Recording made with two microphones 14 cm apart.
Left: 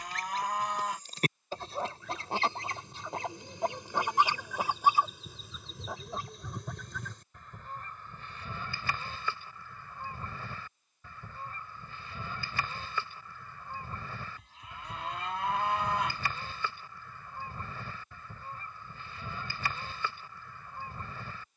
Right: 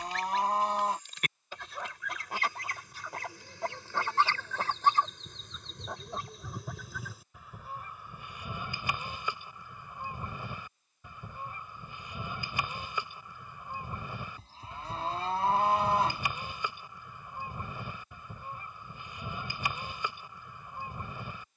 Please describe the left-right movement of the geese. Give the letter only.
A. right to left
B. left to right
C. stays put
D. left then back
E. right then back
B.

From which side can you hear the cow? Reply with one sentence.
You can hear the cow on the right.